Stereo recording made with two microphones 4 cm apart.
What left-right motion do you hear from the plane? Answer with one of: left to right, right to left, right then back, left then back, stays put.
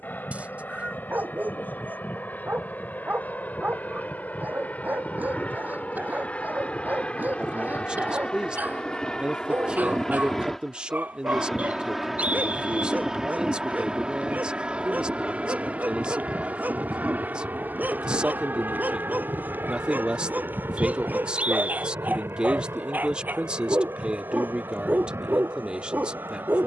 left to right.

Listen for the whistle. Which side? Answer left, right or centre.
right.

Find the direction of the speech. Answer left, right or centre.
right.